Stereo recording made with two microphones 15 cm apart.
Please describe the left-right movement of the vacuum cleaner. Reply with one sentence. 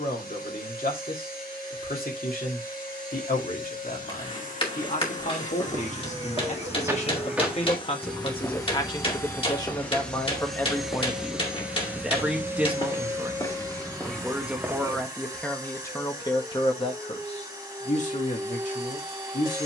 In this clip you hear the vacuum cleaner move to the right.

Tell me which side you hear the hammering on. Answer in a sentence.
In this clip you hear the hammering on the left.